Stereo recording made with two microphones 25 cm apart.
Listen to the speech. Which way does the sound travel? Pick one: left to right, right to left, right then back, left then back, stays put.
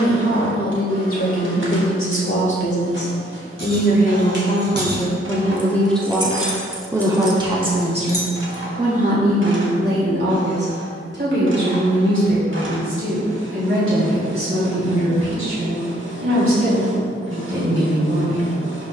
left to right.